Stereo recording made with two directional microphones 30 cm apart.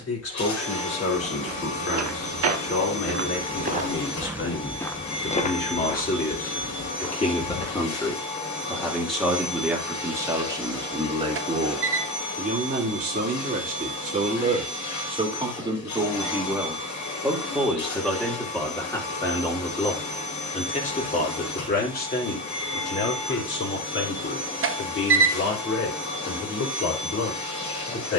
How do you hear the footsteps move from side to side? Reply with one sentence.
You can hear the footsteps travel towards the left.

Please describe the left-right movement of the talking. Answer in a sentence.
You can hear the talking move from left to right and back again.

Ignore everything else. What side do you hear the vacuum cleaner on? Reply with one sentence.
In this clip you hear the vacuum cleaner on the left.